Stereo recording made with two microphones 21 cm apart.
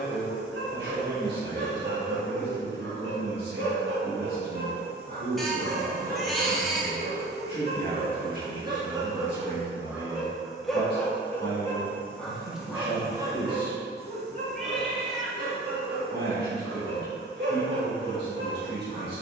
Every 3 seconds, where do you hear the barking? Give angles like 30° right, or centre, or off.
60° right, 50° right, 30° right, centre, 20° right, 50° right, 60° right.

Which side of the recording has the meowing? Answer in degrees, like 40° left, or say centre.
centre.